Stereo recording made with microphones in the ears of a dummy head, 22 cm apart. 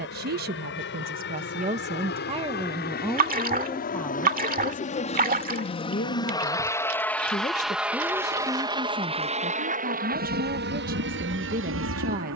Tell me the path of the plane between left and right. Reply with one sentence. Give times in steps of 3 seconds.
In this clip you hear the plane on the left from 0 s, in the centre from 6 s and on the right from 9 s.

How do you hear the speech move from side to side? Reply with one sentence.
You can hear the speech move from right to left and back again.